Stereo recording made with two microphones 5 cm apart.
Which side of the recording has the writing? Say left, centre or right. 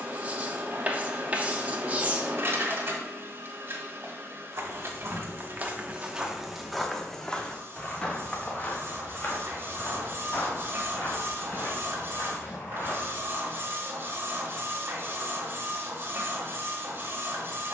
right.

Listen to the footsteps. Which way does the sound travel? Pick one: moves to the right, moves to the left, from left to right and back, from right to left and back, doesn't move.
moves to the left.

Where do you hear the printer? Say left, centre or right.
right.